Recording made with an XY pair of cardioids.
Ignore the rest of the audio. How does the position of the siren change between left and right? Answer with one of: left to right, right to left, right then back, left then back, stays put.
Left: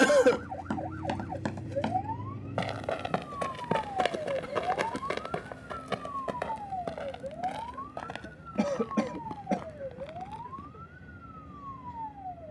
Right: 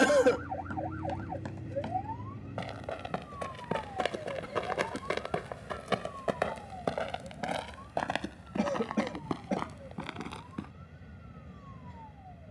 right to left.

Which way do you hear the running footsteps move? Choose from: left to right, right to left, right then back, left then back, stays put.
left to right.